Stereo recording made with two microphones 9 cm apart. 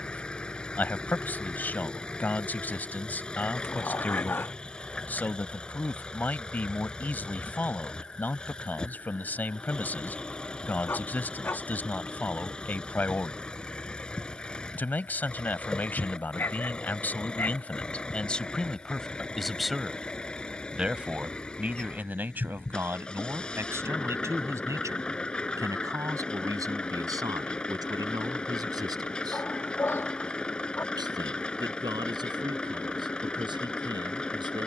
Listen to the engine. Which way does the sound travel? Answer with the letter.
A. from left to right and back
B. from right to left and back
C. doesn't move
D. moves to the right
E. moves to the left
C.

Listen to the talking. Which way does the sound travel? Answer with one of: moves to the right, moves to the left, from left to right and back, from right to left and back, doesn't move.
moves to the right.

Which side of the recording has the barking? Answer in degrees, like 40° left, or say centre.
30° left.